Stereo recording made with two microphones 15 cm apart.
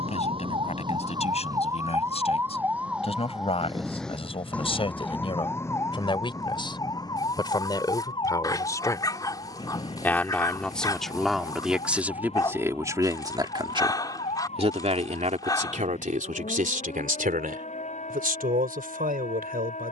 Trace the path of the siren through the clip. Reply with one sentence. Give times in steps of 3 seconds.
You can hear the siren on the right from 0 s, in the centre from 3 s and on the left from 6 s.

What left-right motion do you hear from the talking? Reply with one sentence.
In this clip you hear the talking travel towards the right.